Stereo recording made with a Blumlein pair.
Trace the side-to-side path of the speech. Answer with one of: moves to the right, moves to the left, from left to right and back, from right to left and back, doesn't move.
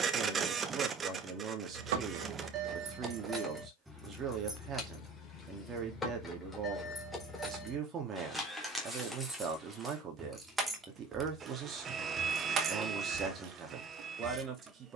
doesn't move.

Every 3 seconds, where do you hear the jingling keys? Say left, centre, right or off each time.
right, centre, centre, centre, right.